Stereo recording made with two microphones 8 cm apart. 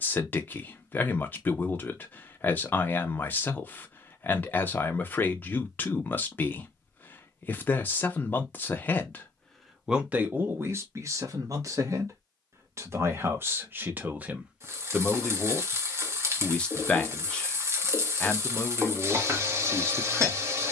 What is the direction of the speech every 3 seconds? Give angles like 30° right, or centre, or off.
20° left, 20° left, 20° left, 30° right, 30° right, 10° left, 10° left.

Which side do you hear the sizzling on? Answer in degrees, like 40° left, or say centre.
30° right.